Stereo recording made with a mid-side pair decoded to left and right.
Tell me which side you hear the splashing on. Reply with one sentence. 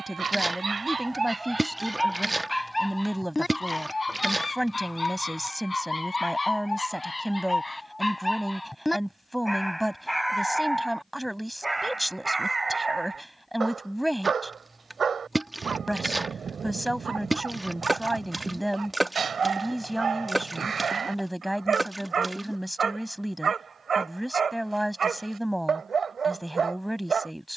You can hear the splashing in the centre.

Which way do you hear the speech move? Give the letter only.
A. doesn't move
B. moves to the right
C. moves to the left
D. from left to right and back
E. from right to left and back
A.